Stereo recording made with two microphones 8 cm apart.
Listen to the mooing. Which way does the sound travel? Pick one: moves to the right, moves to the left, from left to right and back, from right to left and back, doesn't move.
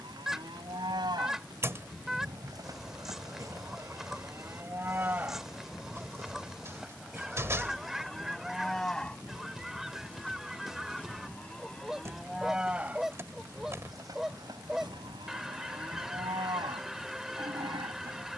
from right to left and back.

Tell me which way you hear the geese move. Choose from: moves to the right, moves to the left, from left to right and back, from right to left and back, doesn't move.
doesn't move.